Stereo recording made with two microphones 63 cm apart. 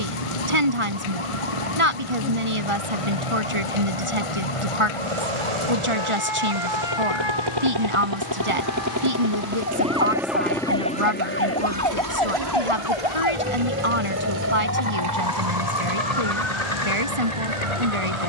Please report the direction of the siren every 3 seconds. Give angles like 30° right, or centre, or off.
60° left, 50° left, 40° left, 20° left, 10° right, 40° right.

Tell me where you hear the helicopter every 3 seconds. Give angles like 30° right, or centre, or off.
70° right, 60° right, 40° right, centre, 50° left, 70° left.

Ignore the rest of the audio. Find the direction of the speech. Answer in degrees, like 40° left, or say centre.
50° right.